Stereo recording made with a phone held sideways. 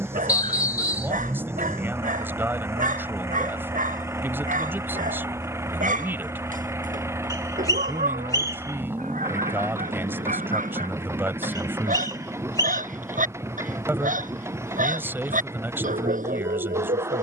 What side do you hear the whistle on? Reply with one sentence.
You can hear the whistle on the left.